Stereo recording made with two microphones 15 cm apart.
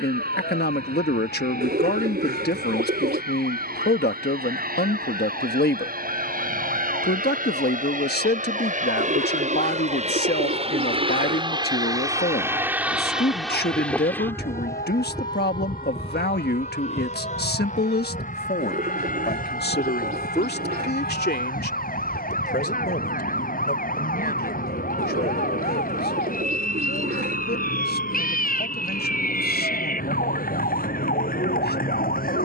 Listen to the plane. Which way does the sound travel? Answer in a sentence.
You can hear the plane go from the right side to the left.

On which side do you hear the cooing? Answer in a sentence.
In this clip you hear the cooing on the right.